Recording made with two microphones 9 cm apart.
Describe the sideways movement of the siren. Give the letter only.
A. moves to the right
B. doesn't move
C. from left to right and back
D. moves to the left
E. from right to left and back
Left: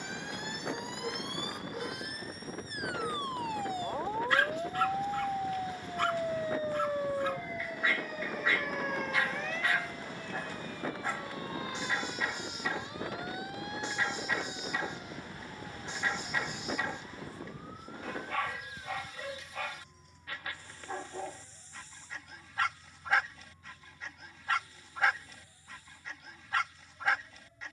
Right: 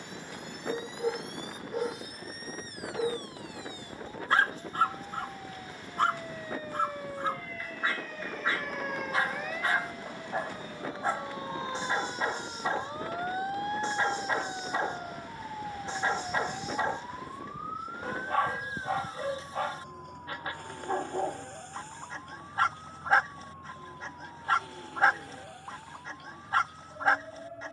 A.